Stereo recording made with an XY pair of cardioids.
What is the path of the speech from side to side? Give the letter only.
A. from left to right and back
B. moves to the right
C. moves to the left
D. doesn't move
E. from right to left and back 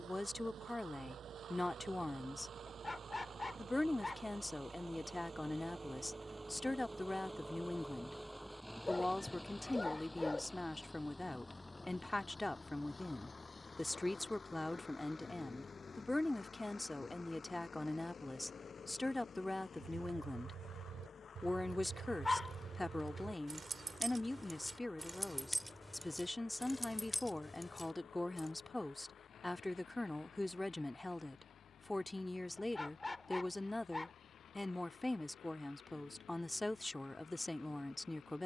D.